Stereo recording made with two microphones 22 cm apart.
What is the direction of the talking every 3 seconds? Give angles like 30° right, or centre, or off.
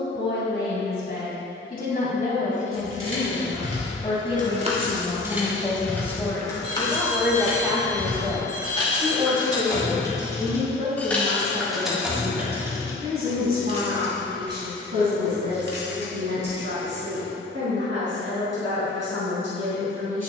40° left, 20° left, centre, 30° right, 50° right, 60° right, 60° right.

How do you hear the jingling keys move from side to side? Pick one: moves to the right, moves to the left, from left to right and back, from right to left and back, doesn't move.
from right to left and back.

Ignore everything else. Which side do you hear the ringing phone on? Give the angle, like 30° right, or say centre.
50° left.